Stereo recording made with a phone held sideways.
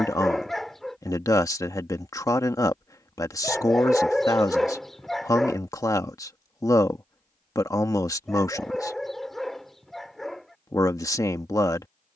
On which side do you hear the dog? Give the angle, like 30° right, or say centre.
centre.